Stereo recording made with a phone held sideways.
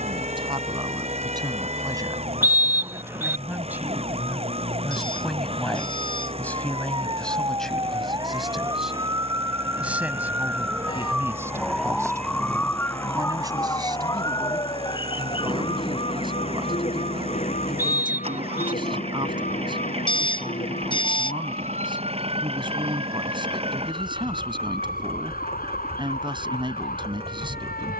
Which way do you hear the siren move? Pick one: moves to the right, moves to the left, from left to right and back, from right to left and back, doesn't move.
moves to the left.